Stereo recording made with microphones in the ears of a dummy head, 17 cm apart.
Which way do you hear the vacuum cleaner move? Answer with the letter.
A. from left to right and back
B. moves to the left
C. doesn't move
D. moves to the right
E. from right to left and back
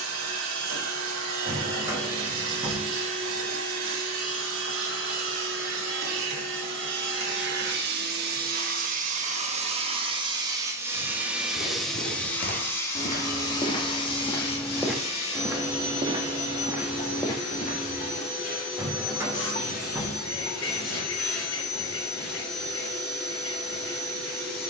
B.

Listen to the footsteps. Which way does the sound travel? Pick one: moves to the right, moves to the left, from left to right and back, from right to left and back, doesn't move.
from left to right and back.